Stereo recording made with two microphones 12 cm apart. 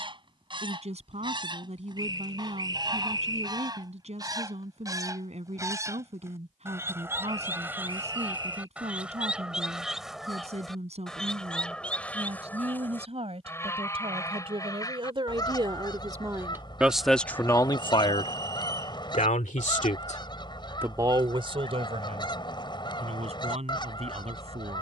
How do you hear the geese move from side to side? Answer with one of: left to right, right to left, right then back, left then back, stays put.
right to left.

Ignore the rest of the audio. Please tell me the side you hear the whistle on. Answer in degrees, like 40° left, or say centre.
30° right.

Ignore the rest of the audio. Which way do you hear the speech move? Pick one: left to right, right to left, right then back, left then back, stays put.
left then back.